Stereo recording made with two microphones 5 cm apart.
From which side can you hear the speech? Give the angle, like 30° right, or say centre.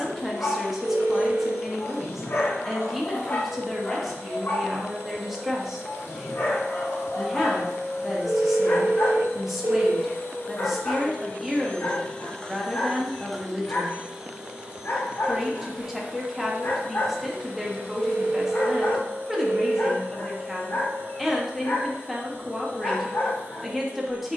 centre.